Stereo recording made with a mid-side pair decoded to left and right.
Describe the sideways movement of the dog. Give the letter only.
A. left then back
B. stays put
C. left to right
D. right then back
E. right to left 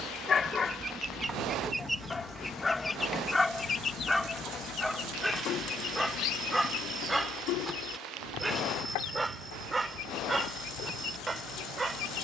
C.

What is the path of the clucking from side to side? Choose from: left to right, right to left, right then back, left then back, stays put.
right to left.